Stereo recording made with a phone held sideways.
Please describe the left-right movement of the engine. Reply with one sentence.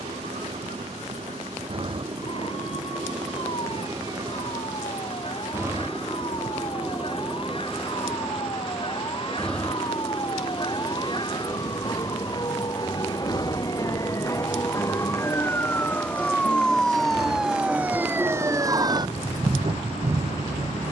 You can hear the engine move from right to left.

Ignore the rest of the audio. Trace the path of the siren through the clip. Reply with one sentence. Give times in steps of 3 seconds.
You can hear the siren on the left from 0 s, in the centre from 15 s and on the right from 18 s.